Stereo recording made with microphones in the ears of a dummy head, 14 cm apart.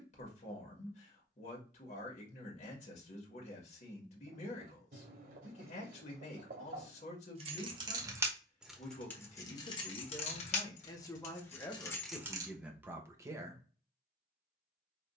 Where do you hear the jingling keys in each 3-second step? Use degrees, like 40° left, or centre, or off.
off, off, 20° right, 30° left, 10° right.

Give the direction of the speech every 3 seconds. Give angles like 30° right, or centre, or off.
50° left, 50° left, 50° left, 30° left, 10° right.